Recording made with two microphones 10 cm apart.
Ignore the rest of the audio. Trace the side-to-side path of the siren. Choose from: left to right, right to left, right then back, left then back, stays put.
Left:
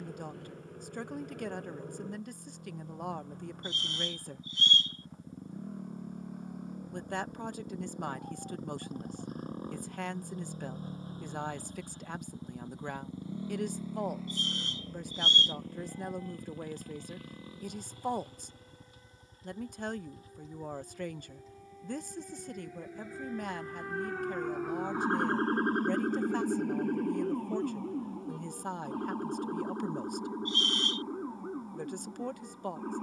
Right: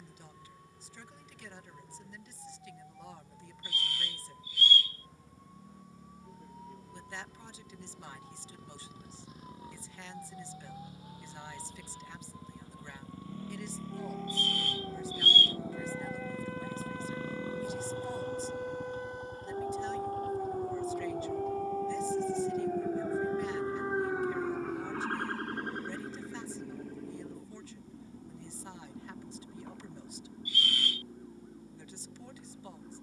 right to left.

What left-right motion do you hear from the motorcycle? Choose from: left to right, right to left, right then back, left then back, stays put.
left to right.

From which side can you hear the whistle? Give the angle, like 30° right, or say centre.
20° left.